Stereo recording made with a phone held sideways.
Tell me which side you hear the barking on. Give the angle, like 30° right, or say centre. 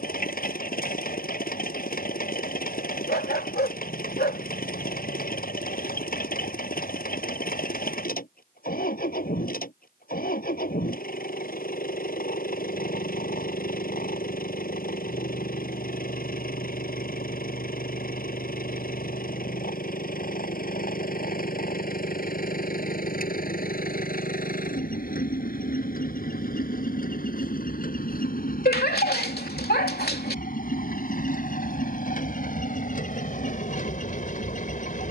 80° left.